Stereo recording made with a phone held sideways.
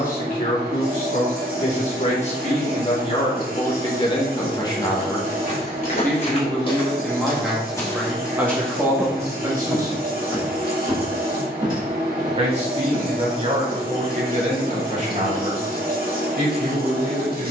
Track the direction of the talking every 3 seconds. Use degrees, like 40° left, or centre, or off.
50° left, 30° left, centre, 20° right, 40° right, 50° right.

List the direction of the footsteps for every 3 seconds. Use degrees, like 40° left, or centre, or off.
off, 50° left, 20° left, 10° right, 30° right, off.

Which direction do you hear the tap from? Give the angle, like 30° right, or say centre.
70° right.